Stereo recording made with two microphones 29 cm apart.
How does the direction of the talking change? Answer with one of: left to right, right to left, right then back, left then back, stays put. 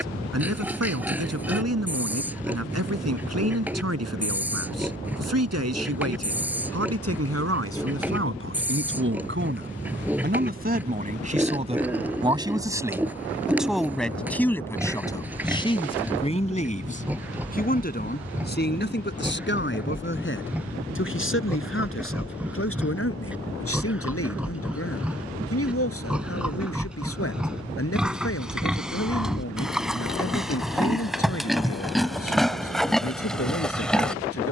right to left.